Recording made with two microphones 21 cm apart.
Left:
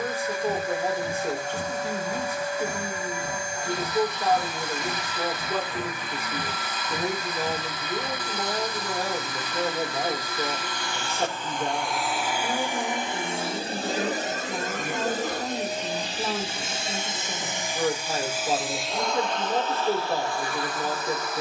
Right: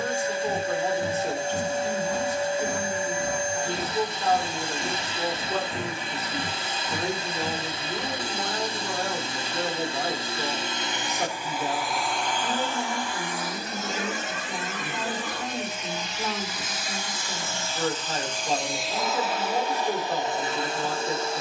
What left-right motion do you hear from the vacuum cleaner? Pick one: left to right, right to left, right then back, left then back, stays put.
left then back.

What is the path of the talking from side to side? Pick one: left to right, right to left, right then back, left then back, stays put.
stays put.